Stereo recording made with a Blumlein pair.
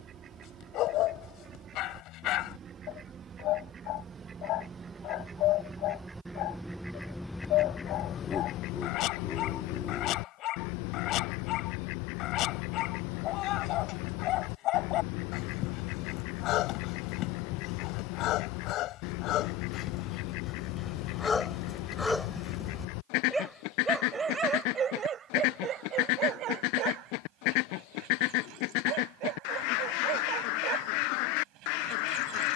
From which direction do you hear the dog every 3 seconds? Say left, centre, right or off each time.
left, left, left, left, left, left, left, centre, right, right, right.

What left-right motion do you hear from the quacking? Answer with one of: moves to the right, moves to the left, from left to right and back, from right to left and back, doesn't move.
moves to the left.